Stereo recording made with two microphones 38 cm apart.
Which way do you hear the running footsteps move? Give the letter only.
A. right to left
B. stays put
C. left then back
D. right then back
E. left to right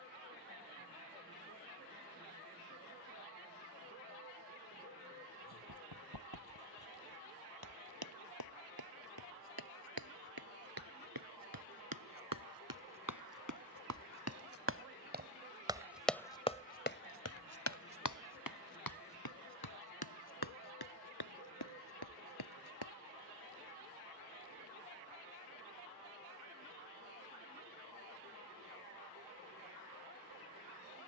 A.